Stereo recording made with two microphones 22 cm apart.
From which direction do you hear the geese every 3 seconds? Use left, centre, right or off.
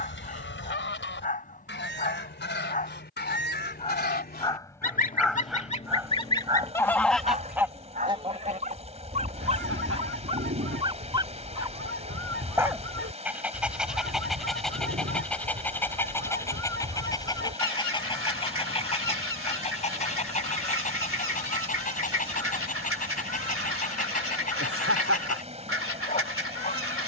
left, left, centre, right, right, right, right, right, right.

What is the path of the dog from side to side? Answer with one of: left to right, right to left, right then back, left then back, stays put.
right then back.